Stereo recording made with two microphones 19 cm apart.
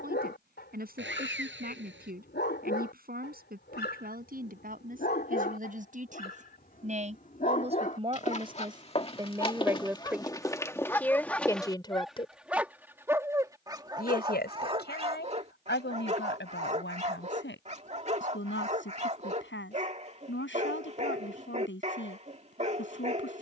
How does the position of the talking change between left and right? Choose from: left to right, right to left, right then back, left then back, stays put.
right to left.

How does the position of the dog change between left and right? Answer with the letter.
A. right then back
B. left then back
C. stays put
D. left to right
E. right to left
D.